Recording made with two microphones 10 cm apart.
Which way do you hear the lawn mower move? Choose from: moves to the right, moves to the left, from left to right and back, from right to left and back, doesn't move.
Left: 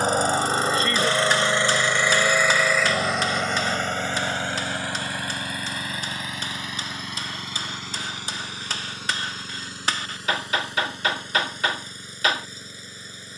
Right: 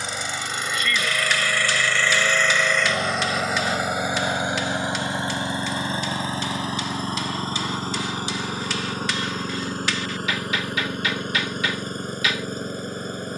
moves to the right.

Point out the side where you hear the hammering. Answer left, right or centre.
left.